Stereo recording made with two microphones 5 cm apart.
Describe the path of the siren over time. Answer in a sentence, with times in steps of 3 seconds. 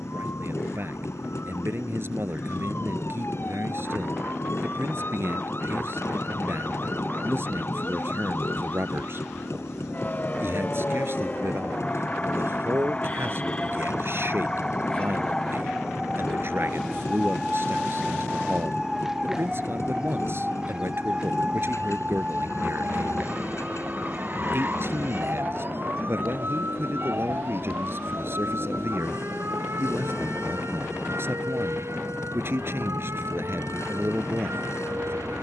You can hear the siren on the left from 0 s, in the centre from 15 s and on the right from 21 s.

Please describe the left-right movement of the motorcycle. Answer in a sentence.
In this clip you hear the motorcycle stay in one place.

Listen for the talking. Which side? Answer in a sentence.
In this clip you hear the talking on the right.